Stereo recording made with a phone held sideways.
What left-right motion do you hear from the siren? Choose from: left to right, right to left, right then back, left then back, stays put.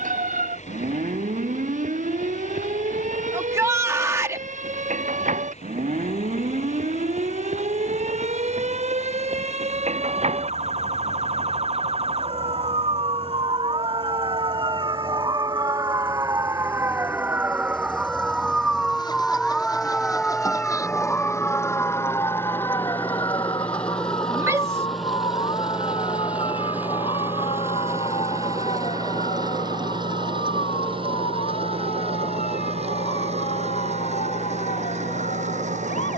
right to left.